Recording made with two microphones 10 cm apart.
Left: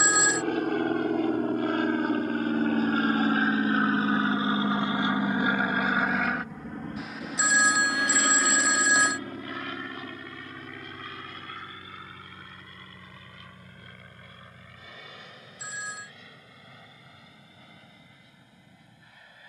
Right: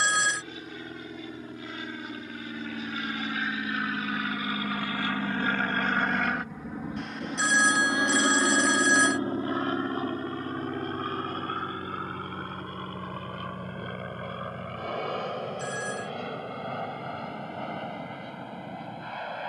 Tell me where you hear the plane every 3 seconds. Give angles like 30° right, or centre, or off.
60° left, 30° left, 10° right, 30° right, 50° right, 50° right, 60° right.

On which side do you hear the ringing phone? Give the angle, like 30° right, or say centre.
centre.